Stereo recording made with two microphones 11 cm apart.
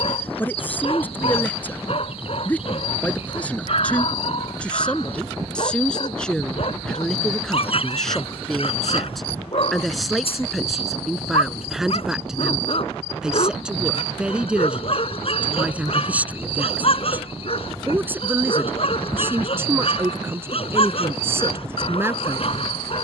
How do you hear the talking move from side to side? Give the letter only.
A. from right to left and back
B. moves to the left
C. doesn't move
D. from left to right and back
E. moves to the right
E.